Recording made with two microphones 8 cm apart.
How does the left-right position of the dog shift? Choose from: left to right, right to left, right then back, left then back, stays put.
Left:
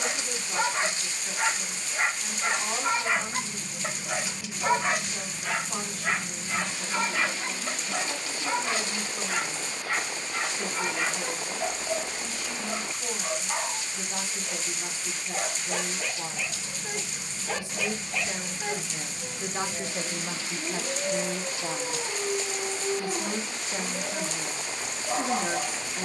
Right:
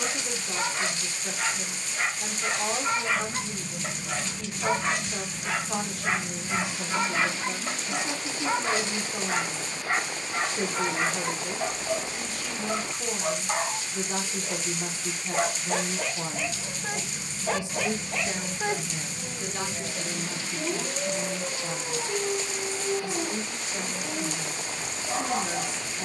right then back.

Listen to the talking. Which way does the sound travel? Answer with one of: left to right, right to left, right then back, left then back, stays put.
right to left.